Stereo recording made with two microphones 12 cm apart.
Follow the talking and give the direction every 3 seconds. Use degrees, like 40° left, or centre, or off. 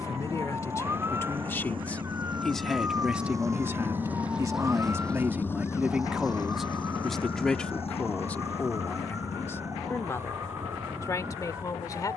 20° left, 20° right, 10° left, 30° left.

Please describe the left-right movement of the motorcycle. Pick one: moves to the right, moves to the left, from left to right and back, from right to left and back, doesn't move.
moves to the left.